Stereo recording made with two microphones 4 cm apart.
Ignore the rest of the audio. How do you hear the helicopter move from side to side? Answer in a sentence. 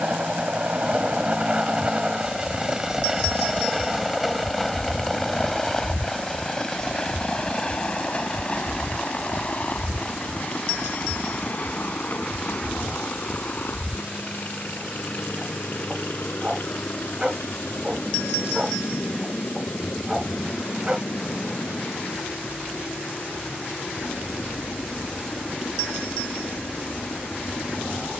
You can hear the helicopter travel towards the left.